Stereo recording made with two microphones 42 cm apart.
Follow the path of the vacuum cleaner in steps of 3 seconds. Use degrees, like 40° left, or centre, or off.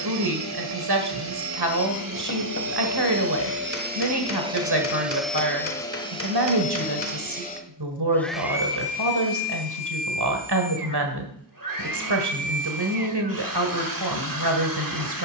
50° right, 10° right, 10° left, 50° right, 50° right.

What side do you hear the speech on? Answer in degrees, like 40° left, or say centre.
70° right.